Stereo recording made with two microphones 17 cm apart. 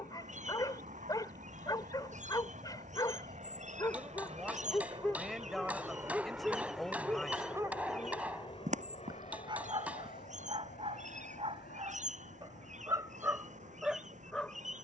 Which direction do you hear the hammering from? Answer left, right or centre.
centre.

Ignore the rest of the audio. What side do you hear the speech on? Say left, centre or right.
centre.